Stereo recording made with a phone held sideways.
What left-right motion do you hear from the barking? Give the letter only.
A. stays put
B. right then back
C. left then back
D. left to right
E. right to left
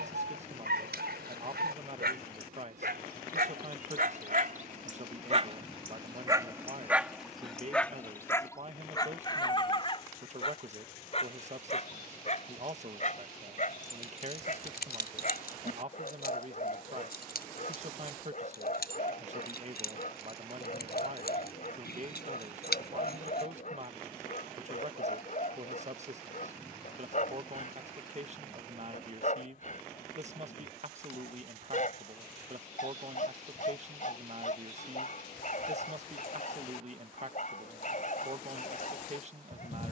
E.